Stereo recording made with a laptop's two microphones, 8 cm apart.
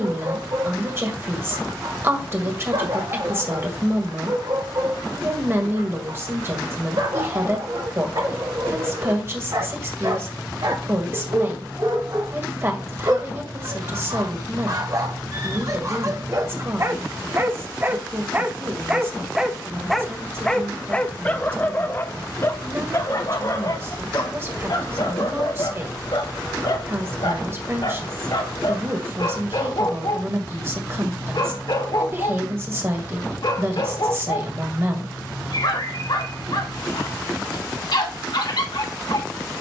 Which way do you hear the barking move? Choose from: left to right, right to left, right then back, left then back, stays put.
right to left.